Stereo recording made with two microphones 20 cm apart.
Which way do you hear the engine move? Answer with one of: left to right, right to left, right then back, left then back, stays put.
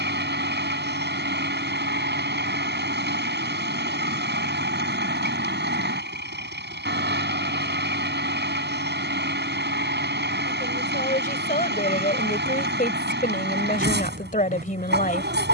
stays put.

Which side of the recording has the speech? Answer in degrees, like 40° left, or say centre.
40° left.